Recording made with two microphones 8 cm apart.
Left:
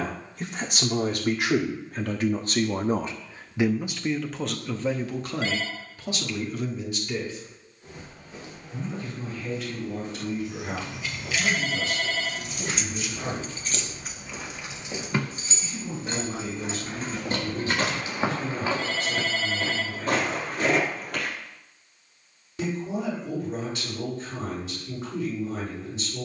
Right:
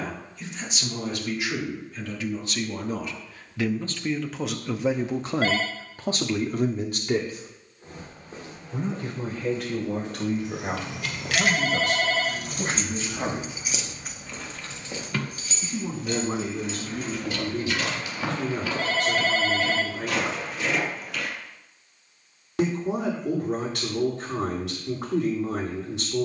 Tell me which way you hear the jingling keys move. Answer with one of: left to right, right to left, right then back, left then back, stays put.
right to left.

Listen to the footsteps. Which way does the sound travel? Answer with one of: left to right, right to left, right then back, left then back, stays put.
right to left.